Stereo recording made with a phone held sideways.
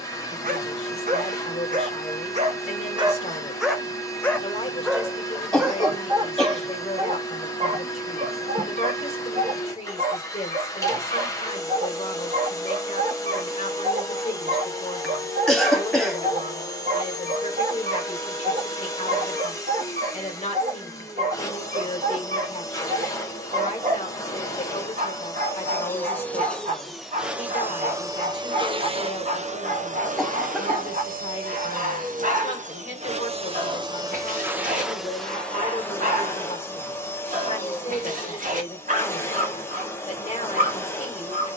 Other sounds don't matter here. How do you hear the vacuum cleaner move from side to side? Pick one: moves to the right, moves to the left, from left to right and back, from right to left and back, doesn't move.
from left to right and back.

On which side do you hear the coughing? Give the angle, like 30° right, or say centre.
centre.